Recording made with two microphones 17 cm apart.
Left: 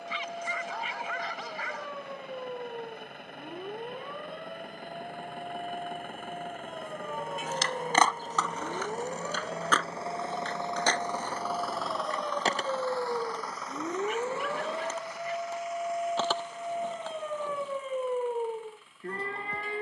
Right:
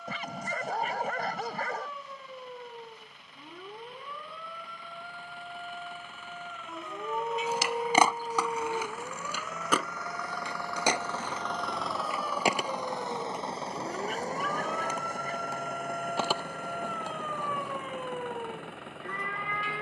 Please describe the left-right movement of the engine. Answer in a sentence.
You can hear the engine move from left to right.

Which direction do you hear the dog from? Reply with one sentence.
In this clip you hear the dog on the right.